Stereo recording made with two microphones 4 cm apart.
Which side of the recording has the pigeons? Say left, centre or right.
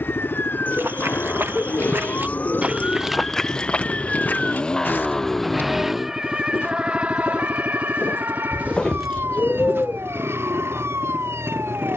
left.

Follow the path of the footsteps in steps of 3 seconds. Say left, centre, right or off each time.
right, left, left, right.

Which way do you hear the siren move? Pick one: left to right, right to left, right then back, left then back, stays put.
left to right.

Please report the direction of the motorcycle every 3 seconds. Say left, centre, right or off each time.
left, left, right, right.